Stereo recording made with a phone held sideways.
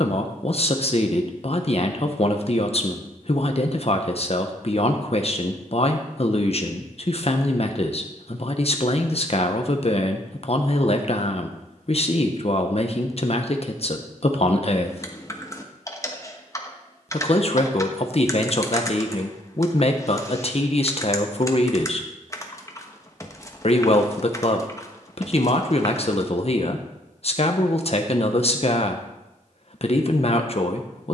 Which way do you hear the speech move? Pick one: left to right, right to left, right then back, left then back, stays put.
stays put.